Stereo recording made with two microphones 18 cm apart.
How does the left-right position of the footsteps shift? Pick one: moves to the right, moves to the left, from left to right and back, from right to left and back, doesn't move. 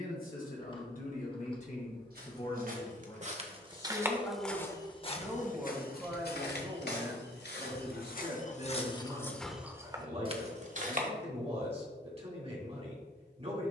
from right to left and back.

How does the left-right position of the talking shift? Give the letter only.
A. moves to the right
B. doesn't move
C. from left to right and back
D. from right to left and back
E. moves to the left
A.